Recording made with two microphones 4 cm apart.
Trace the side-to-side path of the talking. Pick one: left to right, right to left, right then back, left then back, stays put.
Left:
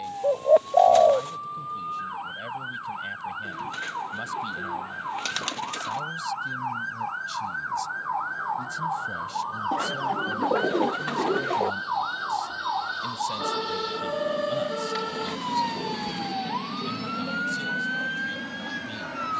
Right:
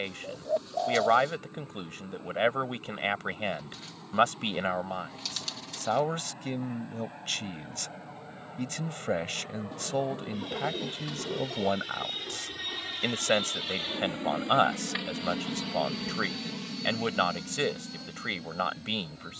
stays put.